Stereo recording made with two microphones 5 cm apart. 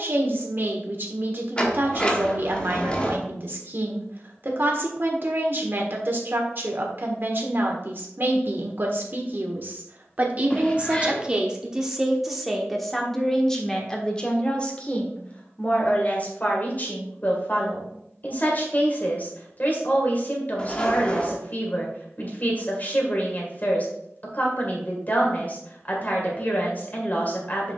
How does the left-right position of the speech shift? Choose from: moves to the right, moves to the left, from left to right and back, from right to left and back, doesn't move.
moves to the left.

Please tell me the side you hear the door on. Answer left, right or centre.
left.